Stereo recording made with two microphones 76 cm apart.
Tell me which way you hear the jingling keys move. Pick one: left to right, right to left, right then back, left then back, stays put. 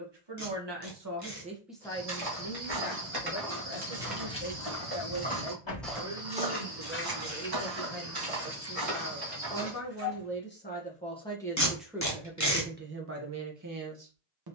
left then back.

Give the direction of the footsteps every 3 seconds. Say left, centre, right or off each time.
right, centre, right, right, off.